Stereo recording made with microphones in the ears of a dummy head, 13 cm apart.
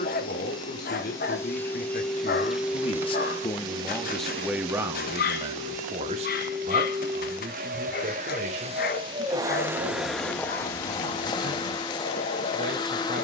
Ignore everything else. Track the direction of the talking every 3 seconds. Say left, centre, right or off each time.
left, centre, right, right, right.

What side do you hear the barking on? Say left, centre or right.
left.